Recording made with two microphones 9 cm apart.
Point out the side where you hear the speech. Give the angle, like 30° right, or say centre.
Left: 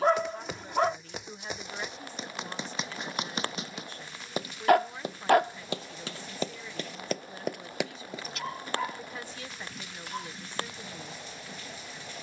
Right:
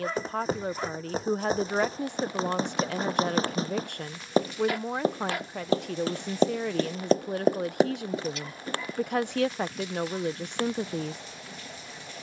70° right.